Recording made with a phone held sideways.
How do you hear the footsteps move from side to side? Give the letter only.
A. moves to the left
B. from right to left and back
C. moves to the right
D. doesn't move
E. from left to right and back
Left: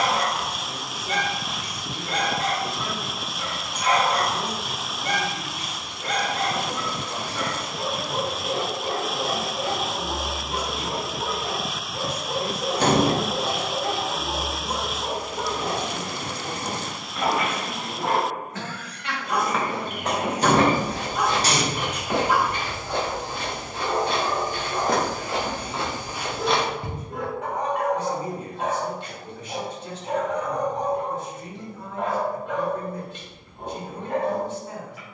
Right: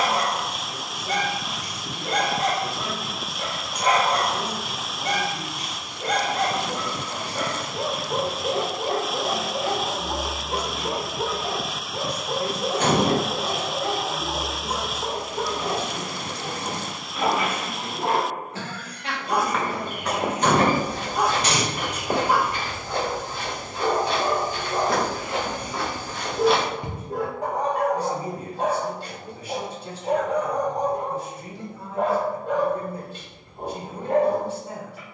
B.